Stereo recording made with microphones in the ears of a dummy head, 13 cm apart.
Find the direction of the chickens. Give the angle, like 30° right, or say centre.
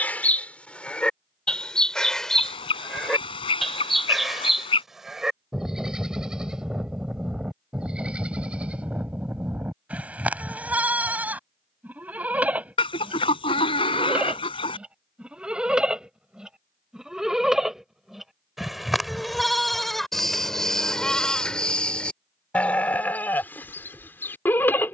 40° left.